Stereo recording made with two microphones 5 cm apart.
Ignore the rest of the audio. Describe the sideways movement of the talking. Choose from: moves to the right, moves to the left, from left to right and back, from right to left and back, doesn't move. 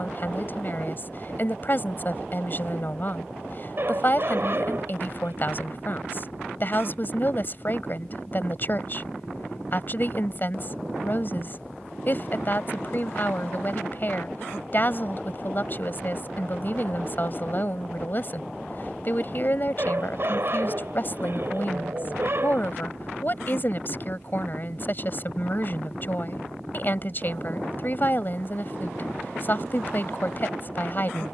doesn't move.